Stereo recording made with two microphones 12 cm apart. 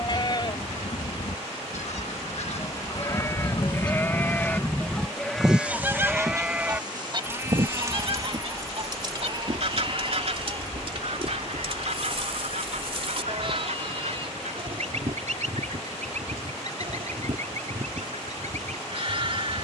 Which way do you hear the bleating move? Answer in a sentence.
You can hear the bleating travel towards the right.